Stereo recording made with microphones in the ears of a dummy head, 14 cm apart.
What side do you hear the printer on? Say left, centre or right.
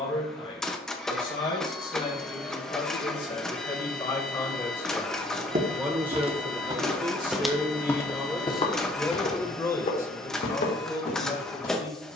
centre.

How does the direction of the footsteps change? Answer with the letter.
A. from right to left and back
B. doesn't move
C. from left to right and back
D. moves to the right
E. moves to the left
E.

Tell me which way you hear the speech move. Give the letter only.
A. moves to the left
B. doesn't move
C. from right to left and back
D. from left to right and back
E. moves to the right
D.